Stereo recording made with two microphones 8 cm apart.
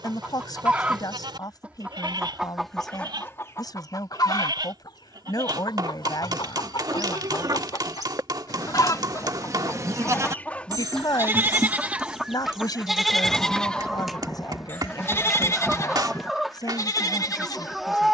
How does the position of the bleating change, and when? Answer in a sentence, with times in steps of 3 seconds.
You can hear the bleating on the right from 0 s, in the centre from 12 s and on the left from 15 s.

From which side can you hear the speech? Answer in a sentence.
In this clip you hear the speech on the left.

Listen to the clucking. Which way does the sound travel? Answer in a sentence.
In this clip you hear the clucking move from right to left and back again.